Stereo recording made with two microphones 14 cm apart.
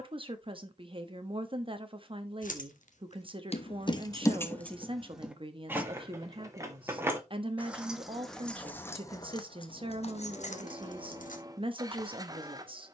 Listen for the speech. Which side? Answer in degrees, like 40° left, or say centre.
40° right.